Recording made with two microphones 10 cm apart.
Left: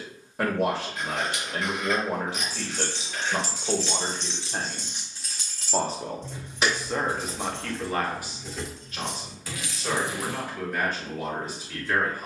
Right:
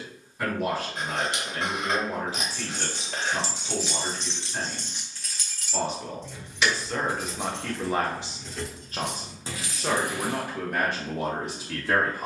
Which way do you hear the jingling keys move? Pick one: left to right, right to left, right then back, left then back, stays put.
left then back.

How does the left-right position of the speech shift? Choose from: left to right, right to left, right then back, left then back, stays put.
left to right.